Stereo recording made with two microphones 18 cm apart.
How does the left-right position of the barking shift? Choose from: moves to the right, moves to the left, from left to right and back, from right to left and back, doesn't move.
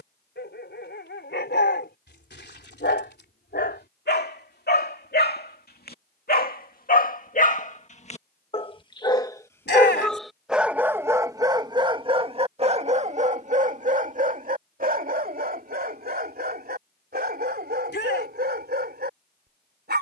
moves to the right.